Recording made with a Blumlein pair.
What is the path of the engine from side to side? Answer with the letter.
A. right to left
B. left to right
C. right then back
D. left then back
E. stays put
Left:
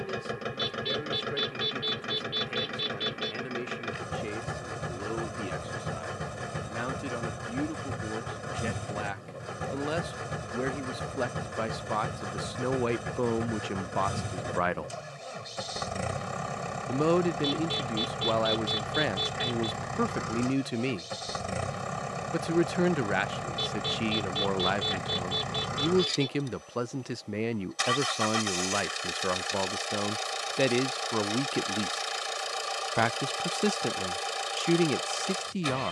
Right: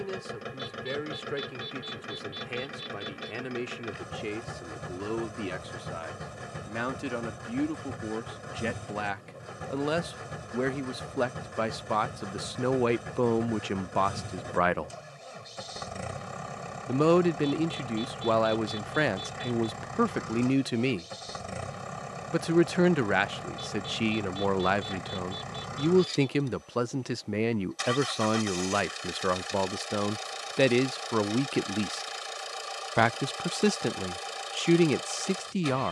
E.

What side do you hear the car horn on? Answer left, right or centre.
left.